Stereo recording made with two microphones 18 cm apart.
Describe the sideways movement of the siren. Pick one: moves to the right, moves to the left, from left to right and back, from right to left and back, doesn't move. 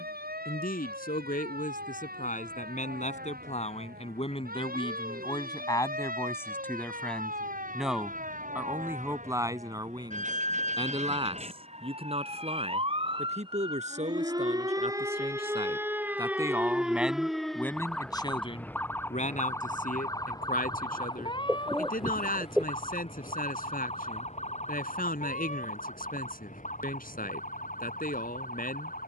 moves to the left.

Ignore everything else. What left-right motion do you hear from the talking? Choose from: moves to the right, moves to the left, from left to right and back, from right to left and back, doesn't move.
from left to right and back.